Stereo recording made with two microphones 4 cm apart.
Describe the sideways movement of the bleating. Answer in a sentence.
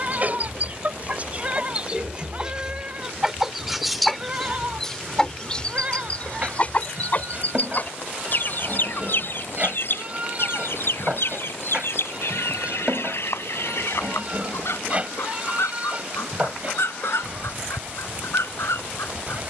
You can hear the bleating stay in one place.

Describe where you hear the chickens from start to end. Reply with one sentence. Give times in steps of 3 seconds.
In this clip you hear the chickens on the right from 0 s, in the centre from 3 s and on the left from 6 s.